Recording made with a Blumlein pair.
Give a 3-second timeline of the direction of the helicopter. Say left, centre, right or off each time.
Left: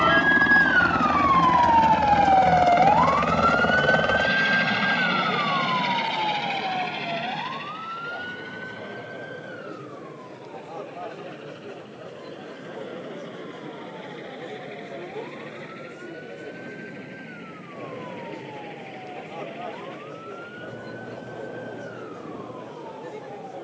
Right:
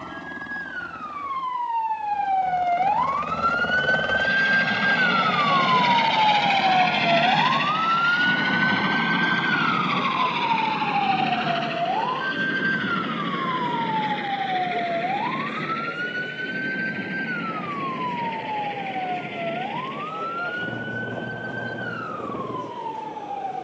left, centre, right, right, right, right, right, right.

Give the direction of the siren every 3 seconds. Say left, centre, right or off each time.
left, centre, right, right, right, right, right, right.